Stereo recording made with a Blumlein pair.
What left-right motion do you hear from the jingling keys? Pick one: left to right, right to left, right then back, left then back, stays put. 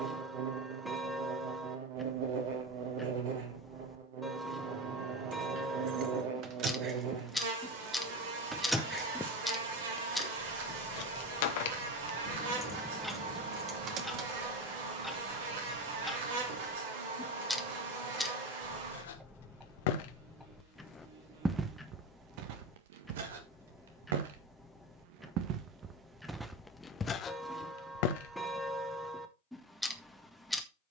left then back.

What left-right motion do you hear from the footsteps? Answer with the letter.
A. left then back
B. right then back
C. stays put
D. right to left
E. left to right
B.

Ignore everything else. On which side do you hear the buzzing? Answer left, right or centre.
right.